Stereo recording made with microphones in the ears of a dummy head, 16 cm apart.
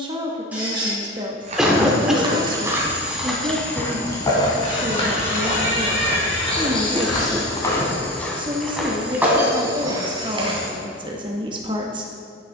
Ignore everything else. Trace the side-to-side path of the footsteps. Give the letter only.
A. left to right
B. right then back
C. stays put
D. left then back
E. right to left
D.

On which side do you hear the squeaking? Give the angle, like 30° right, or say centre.
10° right.